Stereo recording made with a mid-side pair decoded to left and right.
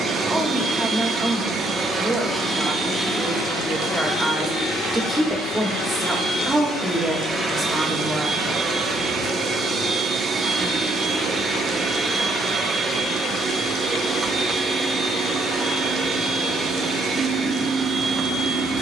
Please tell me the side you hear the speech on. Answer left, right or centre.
centre.